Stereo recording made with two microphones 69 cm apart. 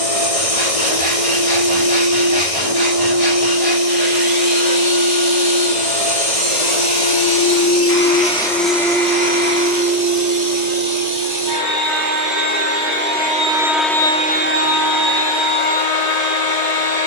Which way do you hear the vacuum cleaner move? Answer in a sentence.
In this clip you hear the vacuum cleaner go right and come back.